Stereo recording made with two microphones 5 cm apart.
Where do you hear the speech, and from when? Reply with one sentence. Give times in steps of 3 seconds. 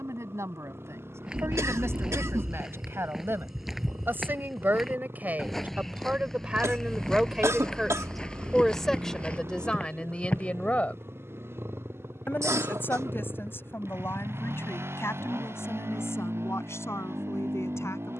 In this clip you hear the speech on the right from 0 s, in the centre from 6 s and on the left from 9 s.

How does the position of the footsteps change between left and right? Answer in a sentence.
In this clip you hear the footsteps move from right to left.